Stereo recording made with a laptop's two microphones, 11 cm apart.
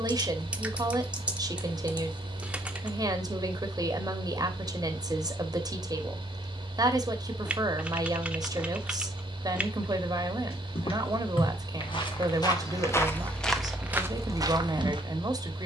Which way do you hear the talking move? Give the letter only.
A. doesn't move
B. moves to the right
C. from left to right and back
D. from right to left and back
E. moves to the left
A.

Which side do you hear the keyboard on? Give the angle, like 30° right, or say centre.
10° right.